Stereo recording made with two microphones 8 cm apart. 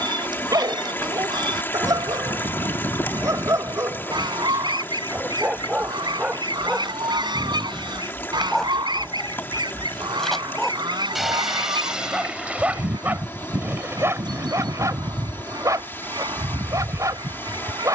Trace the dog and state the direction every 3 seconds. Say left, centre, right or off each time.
right, right, centre, centre, right, right.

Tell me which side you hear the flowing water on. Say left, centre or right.
left.